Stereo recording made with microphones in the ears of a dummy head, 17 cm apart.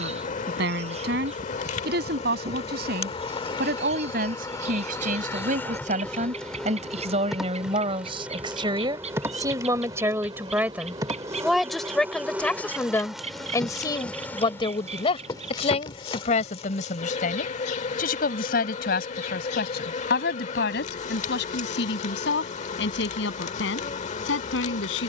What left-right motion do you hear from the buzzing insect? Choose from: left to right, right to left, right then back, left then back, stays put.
right then back.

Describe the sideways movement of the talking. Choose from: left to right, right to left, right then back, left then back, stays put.
right to left.